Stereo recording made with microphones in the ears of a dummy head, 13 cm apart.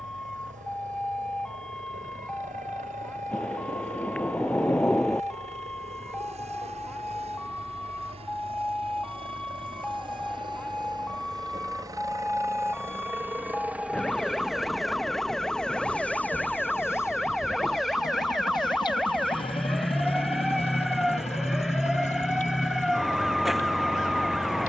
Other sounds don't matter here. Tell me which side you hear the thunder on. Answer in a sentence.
You can hear the thunder in the centre.